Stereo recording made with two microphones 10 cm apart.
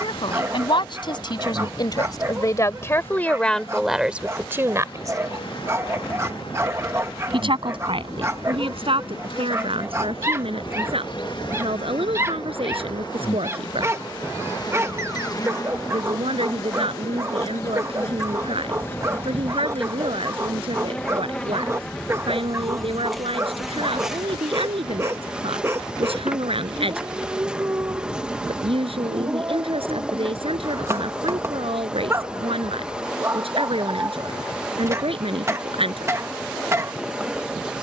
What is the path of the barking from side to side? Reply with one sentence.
You can hear the barking stay put.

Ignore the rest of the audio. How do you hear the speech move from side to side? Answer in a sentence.
In this clip you hear the speech move to the right.